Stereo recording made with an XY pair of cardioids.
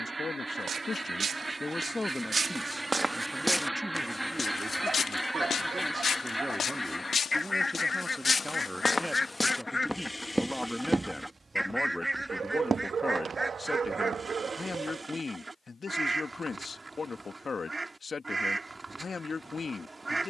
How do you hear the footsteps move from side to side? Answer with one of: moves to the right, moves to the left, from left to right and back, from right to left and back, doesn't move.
from right to left and back.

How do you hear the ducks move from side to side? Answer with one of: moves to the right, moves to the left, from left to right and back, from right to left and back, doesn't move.
from right to left and back.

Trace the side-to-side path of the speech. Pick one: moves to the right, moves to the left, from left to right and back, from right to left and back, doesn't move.
from left to right and back.